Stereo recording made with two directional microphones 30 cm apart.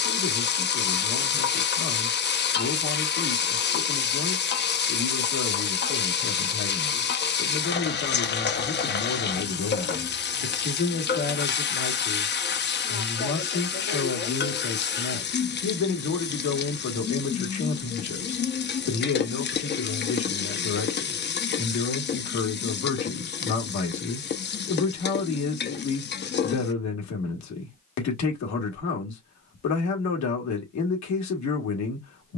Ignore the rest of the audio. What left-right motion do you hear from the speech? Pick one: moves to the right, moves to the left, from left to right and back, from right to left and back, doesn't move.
doesn't move.